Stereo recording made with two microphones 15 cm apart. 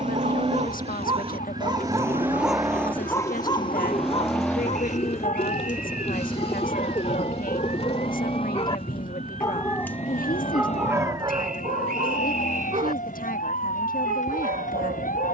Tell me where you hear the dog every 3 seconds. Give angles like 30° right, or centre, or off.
30° right, 40° left, 50° left, 10° right, 60° right.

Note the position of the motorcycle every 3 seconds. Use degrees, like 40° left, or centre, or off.
30° right, 10° left, 30° left, 40° left, 50° left.